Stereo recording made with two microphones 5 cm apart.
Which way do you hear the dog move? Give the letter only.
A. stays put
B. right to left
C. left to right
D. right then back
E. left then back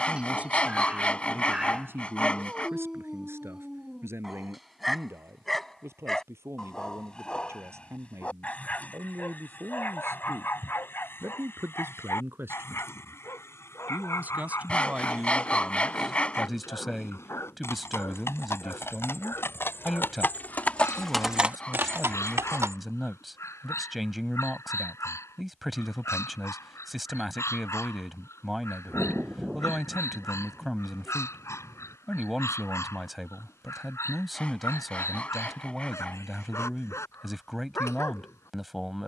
B.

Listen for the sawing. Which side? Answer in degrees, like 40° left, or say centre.
20° left.